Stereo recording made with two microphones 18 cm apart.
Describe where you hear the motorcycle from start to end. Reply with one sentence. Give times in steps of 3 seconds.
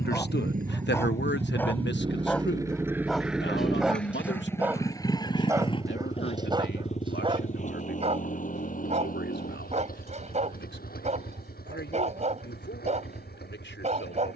You can hear the motorcycle on the right from 0 s, in the centre from 3 s and on the left from 6 s.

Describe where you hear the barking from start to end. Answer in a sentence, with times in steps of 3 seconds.
In this clip you hear the barking in the centre from 0 s and on the right from 6 s.